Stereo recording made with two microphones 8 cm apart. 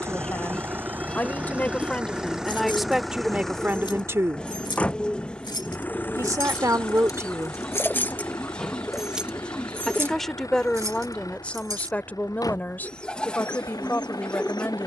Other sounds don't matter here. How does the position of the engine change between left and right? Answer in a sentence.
You can hear the engine go from the right side to the left.